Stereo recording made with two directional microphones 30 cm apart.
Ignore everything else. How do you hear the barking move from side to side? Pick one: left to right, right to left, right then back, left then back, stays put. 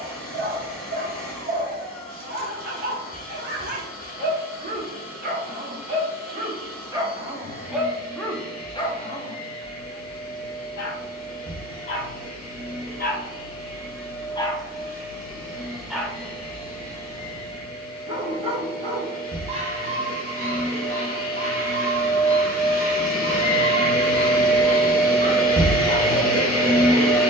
left then back.